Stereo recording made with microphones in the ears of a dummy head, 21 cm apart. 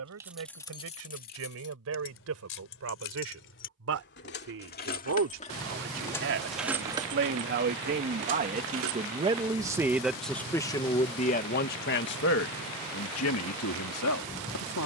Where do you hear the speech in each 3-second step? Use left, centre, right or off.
right, right, right, centre, left.